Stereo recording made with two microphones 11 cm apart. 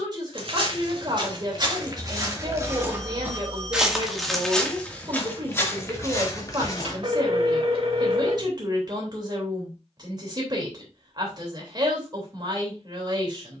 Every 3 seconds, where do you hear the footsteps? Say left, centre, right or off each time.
right, centre, left, off, off.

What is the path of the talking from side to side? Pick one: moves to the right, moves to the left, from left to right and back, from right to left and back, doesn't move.
doesn't move.